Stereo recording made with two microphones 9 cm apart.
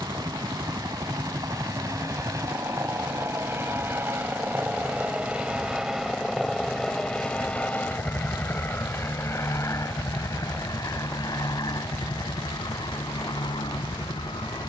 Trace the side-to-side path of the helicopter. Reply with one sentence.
You can hear the helicopter move from right to left.